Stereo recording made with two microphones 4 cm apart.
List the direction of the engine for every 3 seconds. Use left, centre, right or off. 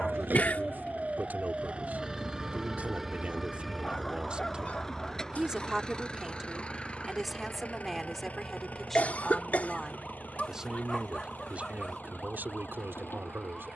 right, centre, left, left, left.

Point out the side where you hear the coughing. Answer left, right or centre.
left.